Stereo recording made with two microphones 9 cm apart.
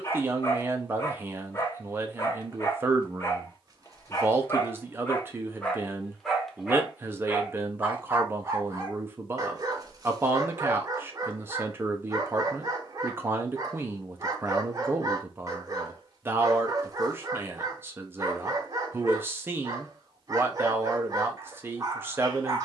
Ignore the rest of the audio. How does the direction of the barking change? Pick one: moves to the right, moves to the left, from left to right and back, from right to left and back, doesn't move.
moves to the right.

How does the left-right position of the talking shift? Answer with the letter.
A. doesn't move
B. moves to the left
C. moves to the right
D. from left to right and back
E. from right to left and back
A.